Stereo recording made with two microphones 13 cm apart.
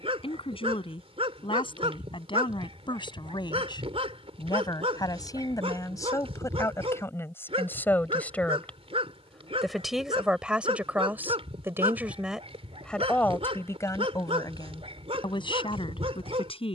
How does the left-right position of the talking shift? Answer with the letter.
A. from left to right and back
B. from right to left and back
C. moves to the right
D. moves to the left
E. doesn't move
A.